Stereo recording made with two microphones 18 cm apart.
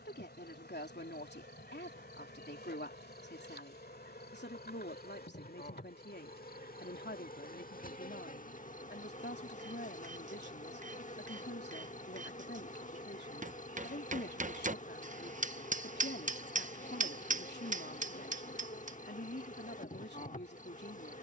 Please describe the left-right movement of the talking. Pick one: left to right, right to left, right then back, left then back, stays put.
stays put.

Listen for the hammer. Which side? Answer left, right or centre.
right.